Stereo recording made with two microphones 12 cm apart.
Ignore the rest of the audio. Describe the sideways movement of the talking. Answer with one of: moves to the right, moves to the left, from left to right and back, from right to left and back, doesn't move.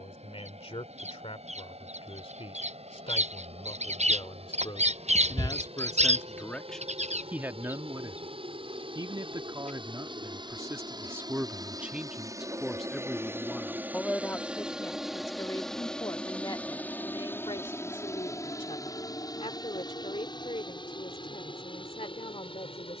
from left to right and back.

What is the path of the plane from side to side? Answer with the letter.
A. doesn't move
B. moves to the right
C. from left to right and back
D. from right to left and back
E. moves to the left
E.